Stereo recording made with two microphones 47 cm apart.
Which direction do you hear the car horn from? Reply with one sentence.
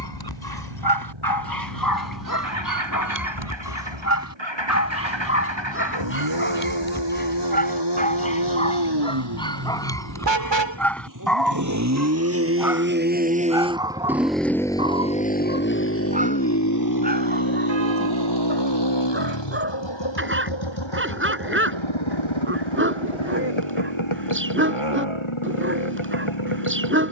In this clip you hear the car horn on the right.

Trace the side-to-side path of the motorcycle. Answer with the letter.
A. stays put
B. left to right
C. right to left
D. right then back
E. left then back
C.